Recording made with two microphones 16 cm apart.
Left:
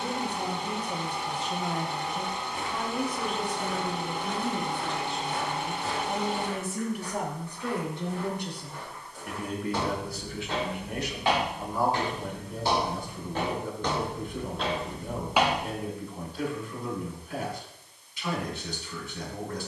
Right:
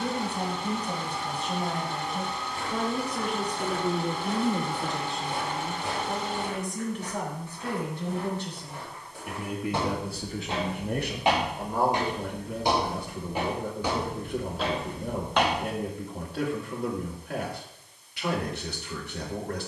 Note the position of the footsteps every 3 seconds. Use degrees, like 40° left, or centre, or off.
20° left, 10° right, 20° right, 20° right, 10° right, 10° left, off.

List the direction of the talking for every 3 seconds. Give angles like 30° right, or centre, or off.
80° right, 50° right, 10° left, 40° right, 80° right, 80° right, 80° right.